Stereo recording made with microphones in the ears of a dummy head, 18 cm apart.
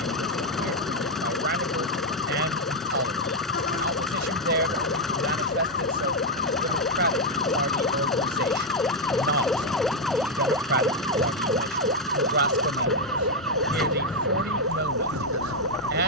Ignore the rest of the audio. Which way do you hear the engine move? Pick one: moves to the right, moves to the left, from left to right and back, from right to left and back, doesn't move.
doesn't move.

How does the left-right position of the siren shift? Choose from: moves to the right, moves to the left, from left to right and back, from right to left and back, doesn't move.
moves to the right.